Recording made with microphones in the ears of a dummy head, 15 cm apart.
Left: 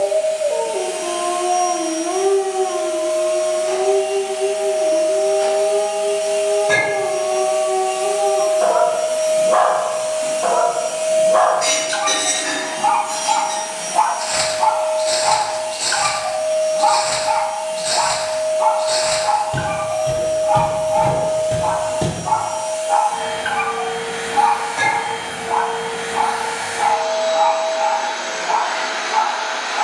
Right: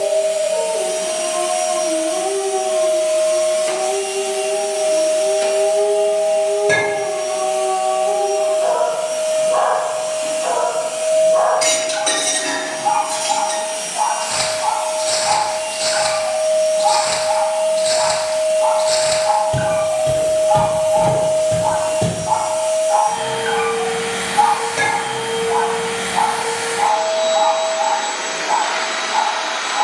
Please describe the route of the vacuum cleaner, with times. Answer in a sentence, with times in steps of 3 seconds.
In this clip you hear the vacuum cleaner on the right from 0 s, in the centre from 6 s and on the right from 12 s.